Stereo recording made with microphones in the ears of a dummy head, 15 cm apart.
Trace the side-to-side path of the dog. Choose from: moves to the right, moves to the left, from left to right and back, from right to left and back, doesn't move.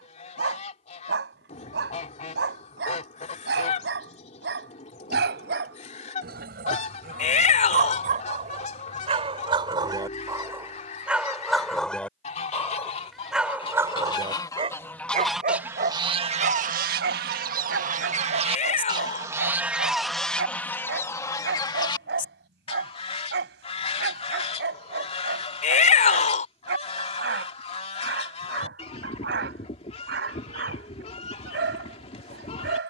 from right to left and back.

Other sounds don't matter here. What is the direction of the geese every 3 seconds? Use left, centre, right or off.
left, left, left, left, left, right, centre, left, left, left, left.